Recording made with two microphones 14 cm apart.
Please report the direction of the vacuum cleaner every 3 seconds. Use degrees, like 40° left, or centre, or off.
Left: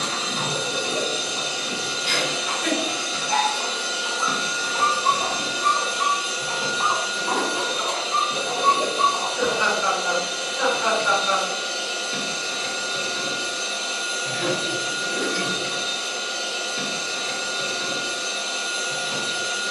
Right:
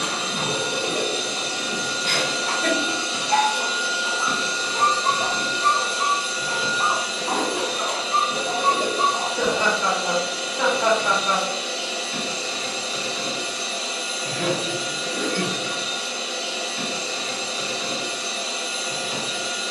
50° right, centre, 20° left, 30° left, 30° left, 30° left, 30° left.